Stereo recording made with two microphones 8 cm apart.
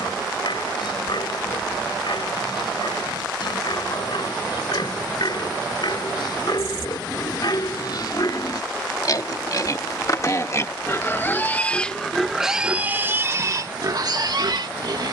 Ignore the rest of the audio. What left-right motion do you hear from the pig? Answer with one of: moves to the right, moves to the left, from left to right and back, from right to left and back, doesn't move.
moves to the right.